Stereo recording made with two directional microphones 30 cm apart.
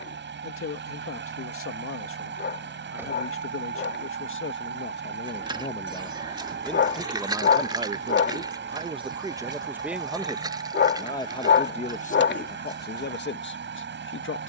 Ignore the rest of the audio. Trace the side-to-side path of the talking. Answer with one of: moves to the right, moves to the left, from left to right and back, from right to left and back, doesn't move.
from left to right and back.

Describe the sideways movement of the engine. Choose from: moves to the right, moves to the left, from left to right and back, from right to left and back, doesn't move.
doesn't move.